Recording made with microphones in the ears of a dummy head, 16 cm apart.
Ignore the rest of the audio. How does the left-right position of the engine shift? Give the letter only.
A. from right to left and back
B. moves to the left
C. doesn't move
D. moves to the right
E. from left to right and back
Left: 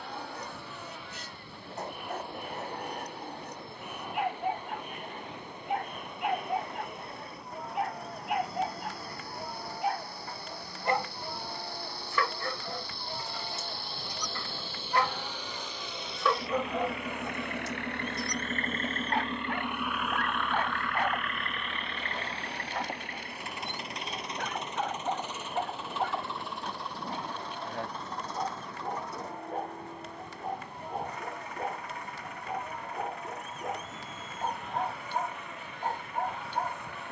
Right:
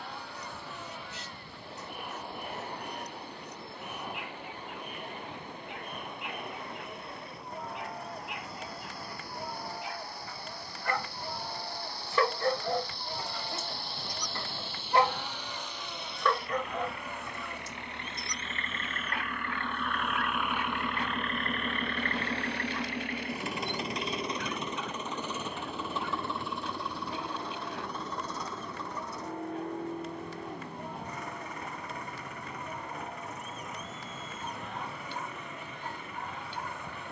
D.